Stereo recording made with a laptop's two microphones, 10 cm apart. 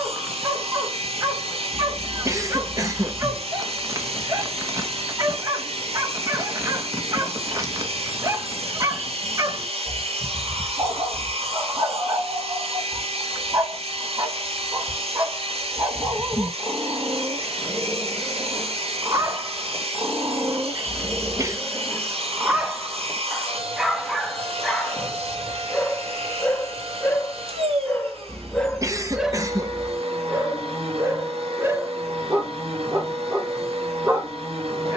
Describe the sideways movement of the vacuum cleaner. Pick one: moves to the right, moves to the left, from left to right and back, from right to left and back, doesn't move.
doesn't move.